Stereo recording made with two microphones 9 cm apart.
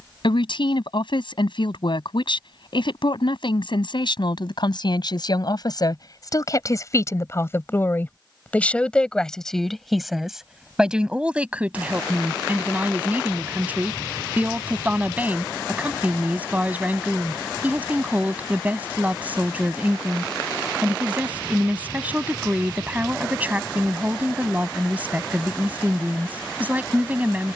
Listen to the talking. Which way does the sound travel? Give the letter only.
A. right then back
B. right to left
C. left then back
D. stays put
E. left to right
E.